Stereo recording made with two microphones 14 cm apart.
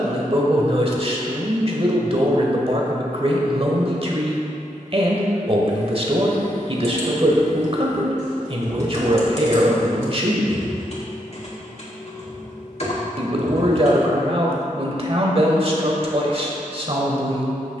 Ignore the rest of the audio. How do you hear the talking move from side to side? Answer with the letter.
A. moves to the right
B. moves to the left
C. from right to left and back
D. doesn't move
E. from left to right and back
D.